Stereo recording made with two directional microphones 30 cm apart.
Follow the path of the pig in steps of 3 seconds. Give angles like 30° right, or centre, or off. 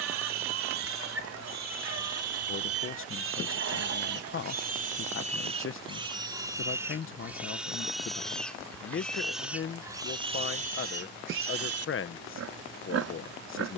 60° right, 30° right, centre, 20° right, 50° right.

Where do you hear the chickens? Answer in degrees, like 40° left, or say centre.
50° right.